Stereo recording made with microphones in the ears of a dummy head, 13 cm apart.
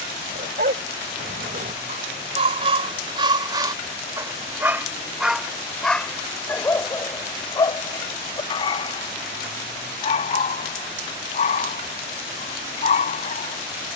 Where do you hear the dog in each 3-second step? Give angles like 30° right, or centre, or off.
50° right, 20° right, 20° left, 50° left, 50° left.